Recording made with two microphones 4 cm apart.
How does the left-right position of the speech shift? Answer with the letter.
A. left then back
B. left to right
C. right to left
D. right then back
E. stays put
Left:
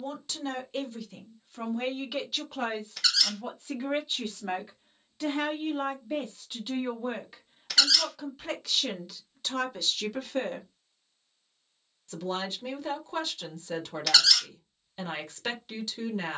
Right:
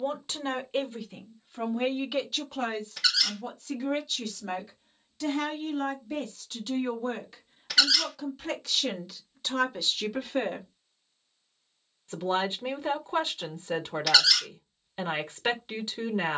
A.